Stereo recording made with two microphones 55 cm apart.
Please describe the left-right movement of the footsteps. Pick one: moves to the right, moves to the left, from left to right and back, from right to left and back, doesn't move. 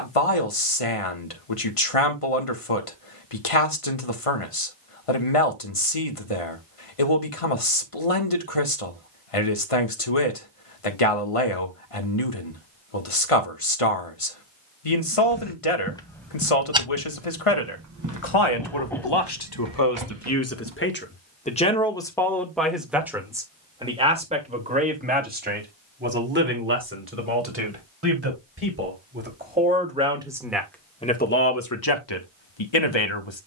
moves to the right.